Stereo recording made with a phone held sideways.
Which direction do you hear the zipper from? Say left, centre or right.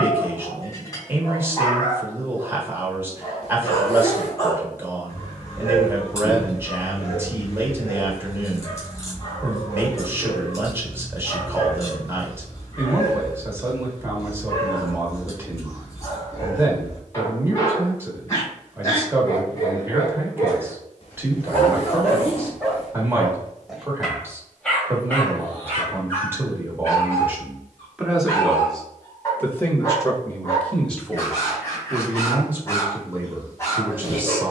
left.